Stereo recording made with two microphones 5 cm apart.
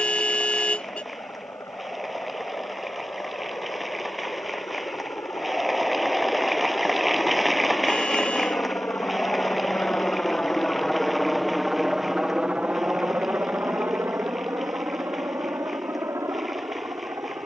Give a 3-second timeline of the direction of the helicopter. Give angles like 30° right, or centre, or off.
80° left, 70° left, 60° left, 20° left, 40° right, 60° right.